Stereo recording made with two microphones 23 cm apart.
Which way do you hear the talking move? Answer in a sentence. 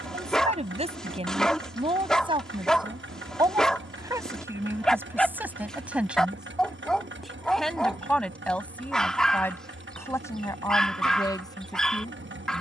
In this clip you hear the talking go from the right side to the left.